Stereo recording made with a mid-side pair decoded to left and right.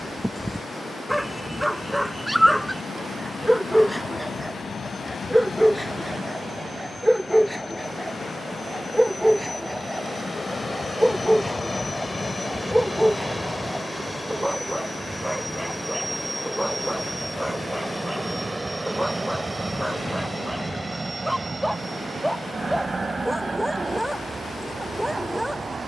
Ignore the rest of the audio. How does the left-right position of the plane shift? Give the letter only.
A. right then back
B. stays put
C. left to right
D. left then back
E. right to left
C.